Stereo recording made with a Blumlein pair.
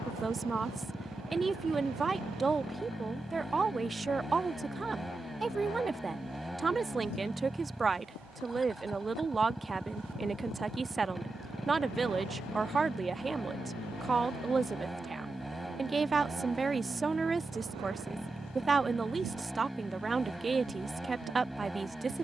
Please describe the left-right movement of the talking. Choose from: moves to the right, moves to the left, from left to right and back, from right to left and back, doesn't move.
doesn't move.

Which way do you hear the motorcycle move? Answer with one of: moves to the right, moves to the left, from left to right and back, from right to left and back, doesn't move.
doesn't move.